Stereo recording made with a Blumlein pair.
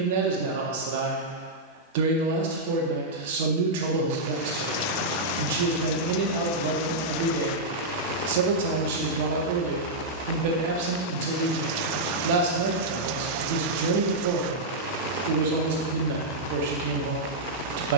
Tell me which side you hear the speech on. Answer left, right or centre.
right.